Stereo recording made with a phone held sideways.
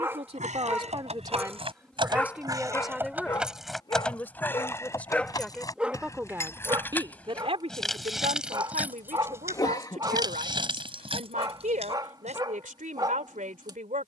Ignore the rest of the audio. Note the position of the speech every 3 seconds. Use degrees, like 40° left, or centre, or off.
30° right, 10° left, 40° right, 70° right, 70° right.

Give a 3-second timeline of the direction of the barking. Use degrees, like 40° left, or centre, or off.
centre, 20° left, 30° right, 30° right, 30° right.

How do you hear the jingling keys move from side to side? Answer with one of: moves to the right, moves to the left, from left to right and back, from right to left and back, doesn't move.
from right to left and back.